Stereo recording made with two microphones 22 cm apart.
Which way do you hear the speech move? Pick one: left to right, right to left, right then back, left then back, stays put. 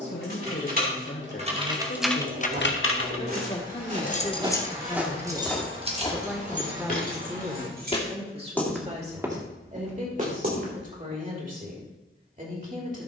left to right.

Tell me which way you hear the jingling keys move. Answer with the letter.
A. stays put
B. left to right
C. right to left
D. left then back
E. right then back
D.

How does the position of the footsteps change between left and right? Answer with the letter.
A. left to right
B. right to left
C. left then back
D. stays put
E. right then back
C.